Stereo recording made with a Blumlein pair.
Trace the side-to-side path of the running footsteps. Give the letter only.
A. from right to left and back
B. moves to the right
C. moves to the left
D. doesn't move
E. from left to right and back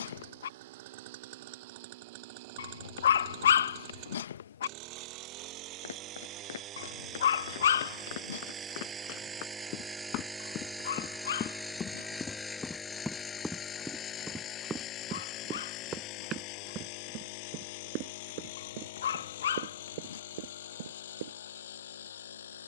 B.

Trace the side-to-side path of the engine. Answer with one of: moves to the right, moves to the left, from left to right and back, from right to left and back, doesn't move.
moves to the left.